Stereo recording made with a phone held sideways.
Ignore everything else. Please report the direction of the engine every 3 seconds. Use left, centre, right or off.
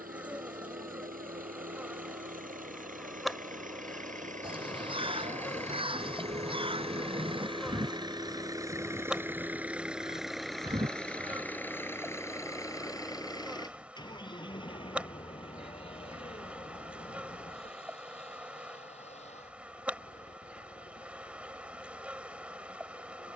right, right, right, centre, left, left, left, left.